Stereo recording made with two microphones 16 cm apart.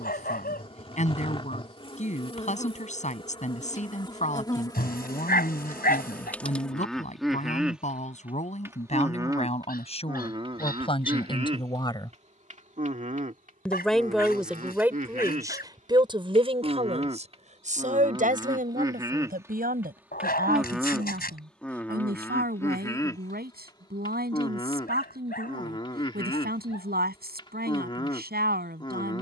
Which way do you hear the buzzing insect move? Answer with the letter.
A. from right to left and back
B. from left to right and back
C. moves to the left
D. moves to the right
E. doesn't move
B.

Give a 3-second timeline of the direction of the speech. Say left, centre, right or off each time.
left, left, left, left, centre, right, right, right, right, right.